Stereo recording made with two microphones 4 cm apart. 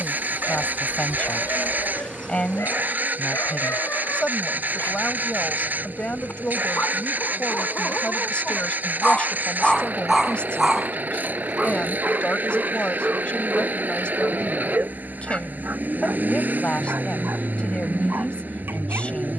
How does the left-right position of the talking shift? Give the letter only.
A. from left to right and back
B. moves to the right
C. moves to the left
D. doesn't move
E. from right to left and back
D.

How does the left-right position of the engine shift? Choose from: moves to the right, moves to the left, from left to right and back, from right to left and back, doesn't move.
doesn't move.